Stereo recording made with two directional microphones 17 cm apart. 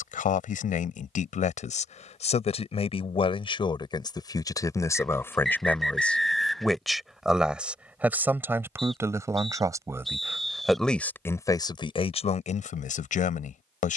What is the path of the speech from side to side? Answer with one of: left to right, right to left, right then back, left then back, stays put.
right then back.